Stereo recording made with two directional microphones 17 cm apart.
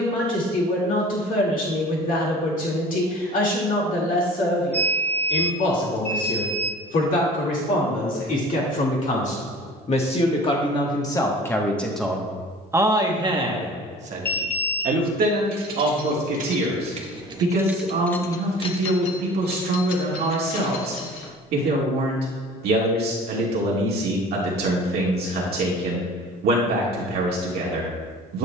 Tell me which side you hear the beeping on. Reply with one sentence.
In this clip you hear the beeping in the centre.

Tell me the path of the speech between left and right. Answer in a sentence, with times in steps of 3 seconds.
In this clip you hear the speech on the left from 0 s and on the right from 12 s.